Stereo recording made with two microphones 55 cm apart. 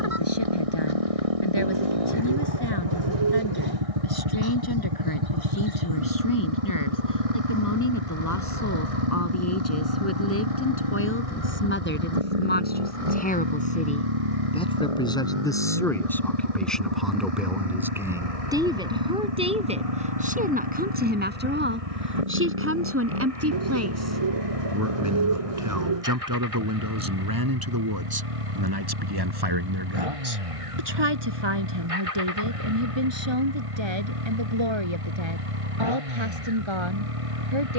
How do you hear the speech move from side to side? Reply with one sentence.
In this clip you hear the speech travel towards the right.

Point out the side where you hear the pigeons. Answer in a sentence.
You can hear the pigeons on the right.